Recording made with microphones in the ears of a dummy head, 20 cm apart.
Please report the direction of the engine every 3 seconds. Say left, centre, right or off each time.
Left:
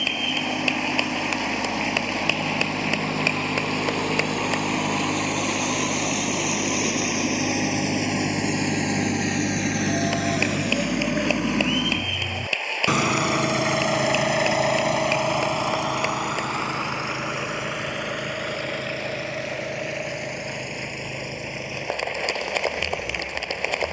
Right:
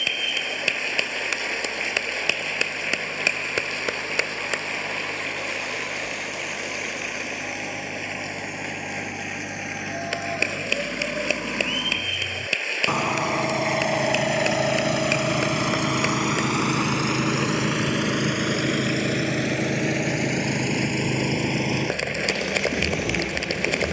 left, left, left, left, centre, right, right, right.